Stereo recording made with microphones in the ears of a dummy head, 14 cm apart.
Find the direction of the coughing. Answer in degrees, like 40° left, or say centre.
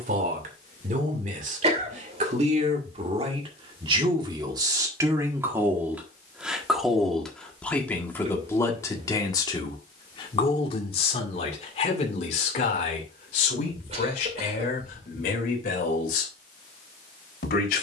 40° right.